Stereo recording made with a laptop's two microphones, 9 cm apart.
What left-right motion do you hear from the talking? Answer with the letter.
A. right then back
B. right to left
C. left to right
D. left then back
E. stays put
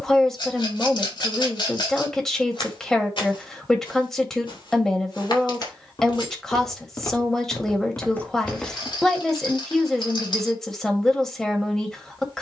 E.